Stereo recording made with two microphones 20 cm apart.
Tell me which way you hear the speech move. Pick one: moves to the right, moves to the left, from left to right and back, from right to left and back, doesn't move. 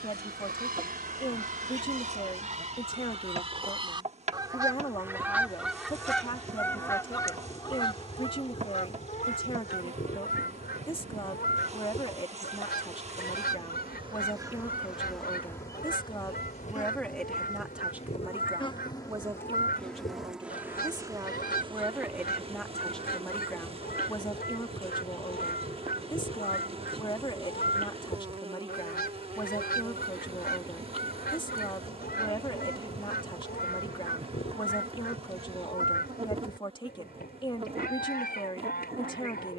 from left to right and back.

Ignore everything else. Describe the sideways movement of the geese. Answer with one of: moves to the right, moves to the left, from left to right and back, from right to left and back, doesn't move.
moves to the left.